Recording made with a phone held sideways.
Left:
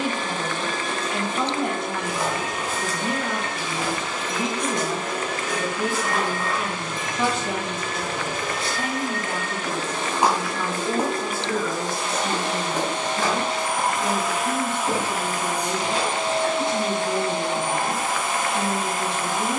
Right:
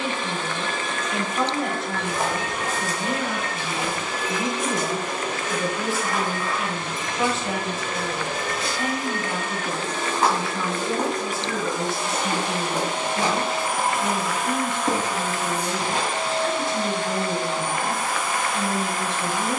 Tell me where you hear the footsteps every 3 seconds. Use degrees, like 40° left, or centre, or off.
50° right, 10° right, 30° left, 10° left, 20° right, 40° right, off.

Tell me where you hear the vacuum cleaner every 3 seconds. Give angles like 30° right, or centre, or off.
20° left, 10° right, 30° right, 20° right, 10° right, 20° left, 20° left.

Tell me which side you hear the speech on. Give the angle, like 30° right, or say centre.
centre.